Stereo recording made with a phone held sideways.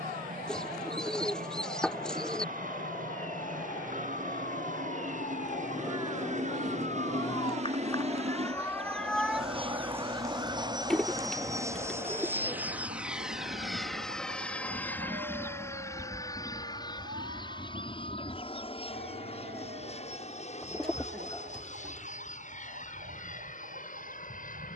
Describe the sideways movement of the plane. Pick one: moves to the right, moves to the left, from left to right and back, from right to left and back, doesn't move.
moves to the left.